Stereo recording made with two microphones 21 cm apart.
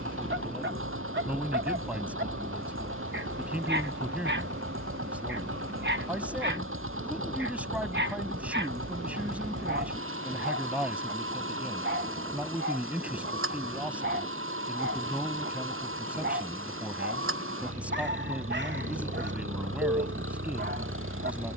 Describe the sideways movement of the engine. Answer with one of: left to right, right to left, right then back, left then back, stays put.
stays put.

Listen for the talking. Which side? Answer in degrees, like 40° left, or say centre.
10° right.